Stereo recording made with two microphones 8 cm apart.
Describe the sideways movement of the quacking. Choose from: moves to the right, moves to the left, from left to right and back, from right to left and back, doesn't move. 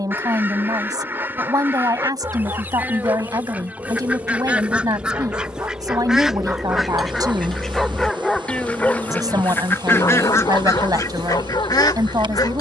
moves to the left.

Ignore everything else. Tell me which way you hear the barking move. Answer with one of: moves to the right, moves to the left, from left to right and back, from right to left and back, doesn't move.
moves to the left.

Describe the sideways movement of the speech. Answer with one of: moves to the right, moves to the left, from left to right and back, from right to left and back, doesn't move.
doesn't move.